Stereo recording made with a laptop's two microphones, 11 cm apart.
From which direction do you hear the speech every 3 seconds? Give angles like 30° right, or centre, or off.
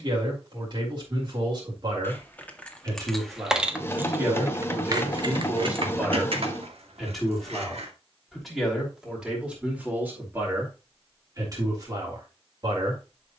40° right, 20° right, centre, 20° right, 40° right.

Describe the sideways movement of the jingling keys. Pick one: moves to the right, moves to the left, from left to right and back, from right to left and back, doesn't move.
moves to the right.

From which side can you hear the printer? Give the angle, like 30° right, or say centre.
20° left.